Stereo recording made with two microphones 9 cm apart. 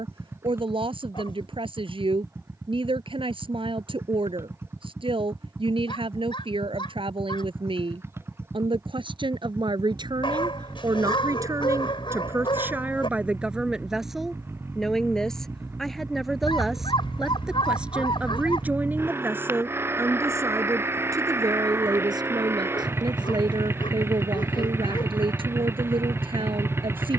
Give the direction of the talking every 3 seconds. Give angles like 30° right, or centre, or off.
80° right, 80° right, 80° right, 50° right, 10° right, centre, 20° right, 50° right, 70° right.